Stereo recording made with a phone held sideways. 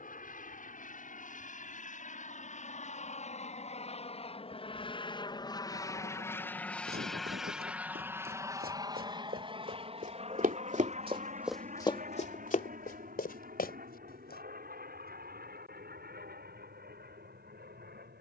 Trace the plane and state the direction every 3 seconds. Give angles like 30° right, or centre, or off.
60° left, 40° left, centre, 40° right, 60° right, 70° right.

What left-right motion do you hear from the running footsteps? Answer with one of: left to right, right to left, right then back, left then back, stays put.
right to left.